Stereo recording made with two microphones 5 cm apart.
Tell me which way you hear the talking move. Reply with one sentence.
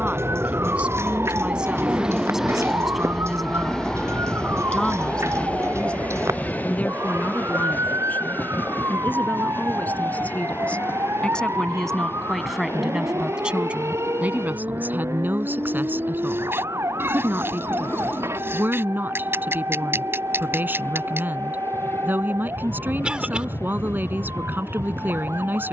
In this clip you hear the talking move from right to left and back again.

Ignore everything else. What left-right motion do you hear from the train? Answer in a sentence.
In this clip you hear the train move to the left.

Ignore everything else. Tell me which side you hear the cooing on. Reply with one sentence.
In this clip you hear the cooing on the right.